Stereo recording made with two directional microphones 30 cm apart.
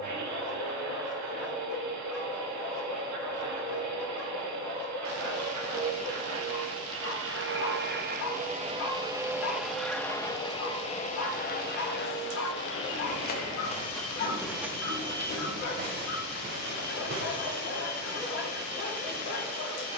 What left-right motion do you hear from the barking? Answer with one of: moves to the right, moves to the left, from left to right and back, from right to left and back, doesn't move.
doesn't move.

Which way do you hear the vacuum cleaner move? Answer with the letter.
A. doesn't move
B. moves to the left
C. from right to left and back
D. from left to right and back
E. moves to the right
B.